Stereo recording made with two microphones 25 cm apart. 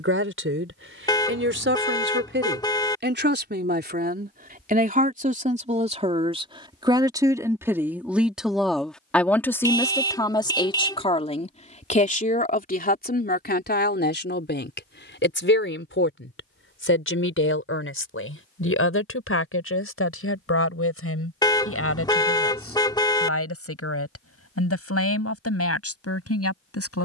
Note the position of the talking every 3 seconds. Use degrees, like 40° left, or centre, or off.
50° right, 40° right, 10° right, 20° left, 40° left, 50° left, 60° left, 70° left, 70° left.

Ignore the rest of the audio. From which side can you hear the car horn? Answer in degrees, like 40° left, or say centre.
20° left.